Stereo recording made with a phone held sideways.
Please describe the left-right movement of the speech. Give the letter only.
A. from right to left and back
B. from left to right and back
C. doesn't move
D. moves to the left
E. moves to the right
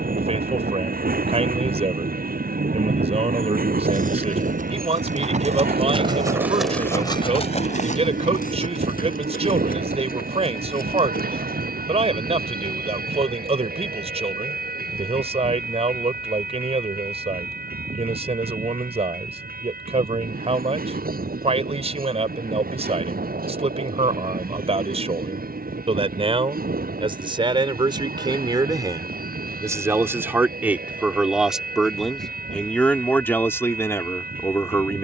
D.